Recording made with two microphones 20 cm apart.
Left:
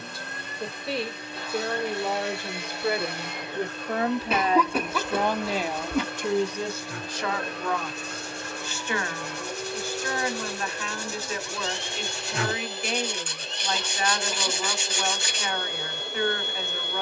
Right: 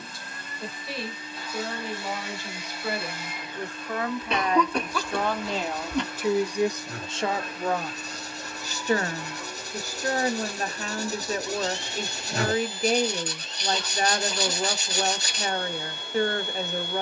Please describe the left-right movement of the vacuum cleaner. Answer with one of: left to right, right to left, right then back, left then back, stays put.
stays put.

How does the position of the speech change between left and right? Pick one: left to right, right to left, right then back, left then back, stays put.
left to right.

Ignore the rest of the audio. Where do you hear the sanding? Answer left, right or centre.
right.